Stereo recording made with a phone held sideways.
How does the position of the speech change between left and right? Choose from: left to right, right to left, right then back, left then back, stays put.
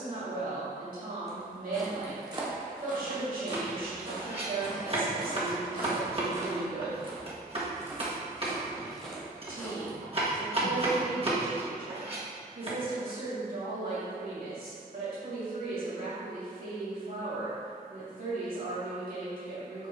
stays put.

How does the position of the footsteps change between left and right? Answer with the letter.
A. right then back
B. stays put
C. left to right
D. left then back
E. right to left
A.